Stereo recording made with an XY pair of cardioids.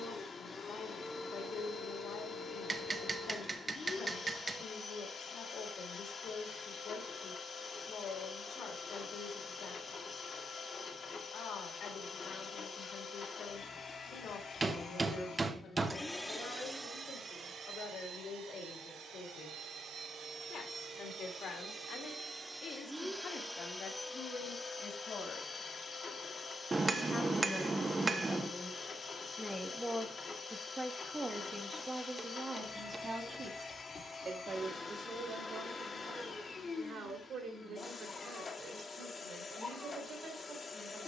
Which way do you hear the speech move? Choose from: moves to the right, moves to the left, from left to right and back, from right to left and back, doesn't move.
moves to the right.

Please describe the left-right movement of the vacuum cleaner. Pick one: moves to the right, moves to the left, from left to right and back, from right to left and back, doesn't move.
from left to right and back.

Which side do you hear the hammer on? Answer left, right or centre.
right.